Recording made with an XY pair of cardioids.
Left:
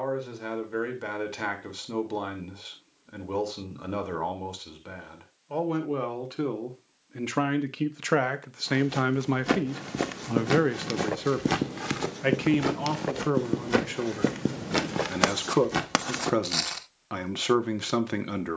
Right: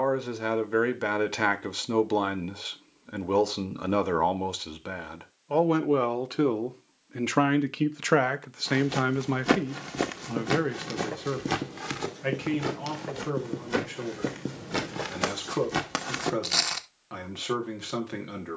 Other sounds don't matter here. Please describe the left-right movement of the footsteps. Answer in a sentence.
In this clip you hear the footsteps move from right to left and back again.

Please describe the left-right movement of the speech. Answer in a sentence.
In this clip you hear the speech go from the right side to the left.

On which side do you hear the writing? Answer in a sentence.
You can hear the writing on the left.